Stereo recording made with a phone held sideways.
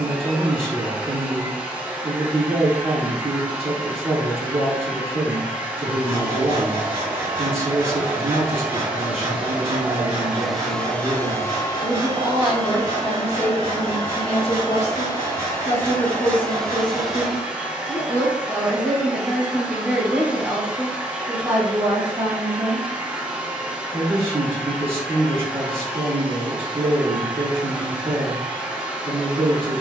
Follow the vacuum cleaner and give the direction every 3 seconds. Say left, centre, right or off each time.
centre, centre, centre, centre, left, centre, centre, centre, centre, centre.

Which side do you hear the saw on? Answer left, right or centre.
right.